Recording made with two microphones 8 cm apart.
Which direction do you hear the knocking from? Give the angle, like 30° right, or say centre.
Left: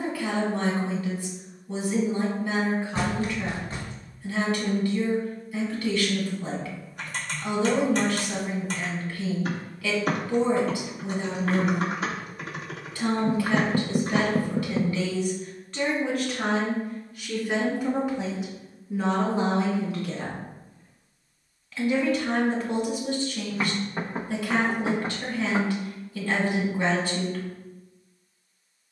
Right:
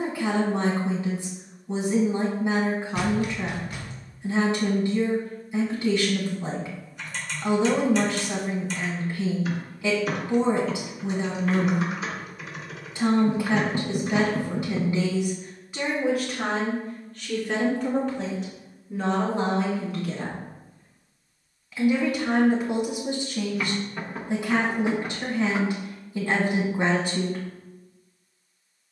30° left.